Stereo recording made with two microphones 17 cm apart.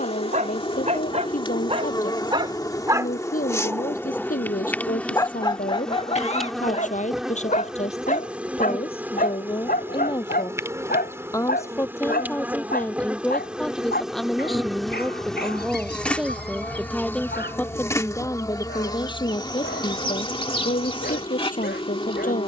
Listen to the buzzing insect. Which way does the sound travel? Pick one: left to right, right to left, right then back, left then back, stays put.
right then back.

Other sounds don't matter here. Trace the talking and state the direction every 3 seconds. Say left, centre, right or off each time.
left, left, left, left, centre, centre, left, left.